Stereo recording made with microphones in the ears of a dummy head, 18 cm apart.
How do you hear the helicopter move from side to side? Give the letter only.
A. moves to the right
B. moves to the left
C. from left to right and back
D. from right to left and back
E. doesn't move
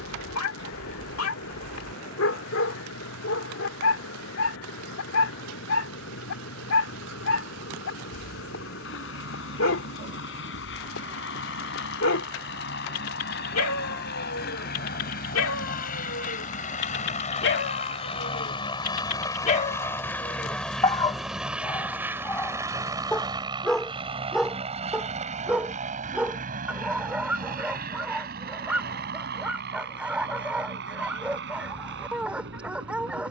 A.